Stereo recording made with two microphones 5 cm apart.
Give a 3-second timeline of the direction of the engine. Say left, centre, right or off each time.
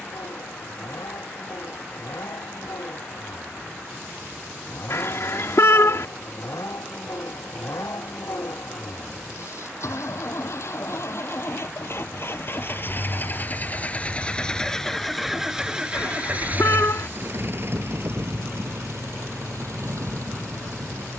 left, left, left, left, left, right, right.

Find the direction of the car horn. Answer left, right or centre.
left.